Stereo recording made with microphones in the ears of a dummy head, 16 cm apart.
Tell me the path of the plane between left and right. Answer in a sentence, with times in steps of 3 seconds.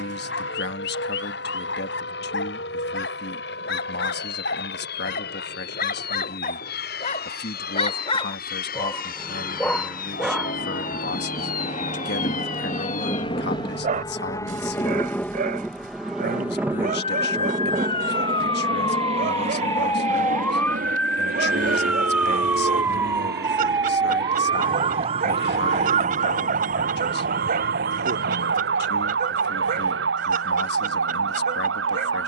In this clip you hear the plane on the left from 0 s, in the centre from 15 s and on the right from 18 s.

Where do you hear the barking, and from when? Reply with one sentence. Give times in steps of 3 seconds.
You can hear the barking on the left from 0 s, in the centre from 9 s and on the right from 12 s.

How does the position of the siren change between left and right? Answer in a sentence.
You can hear the siren move from left to right.